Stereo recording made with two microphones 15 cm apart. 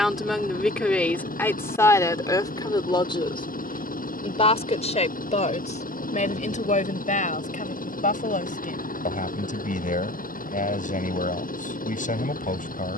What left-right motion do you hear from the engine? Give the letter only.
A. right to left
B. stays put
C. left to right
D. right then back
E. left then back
B.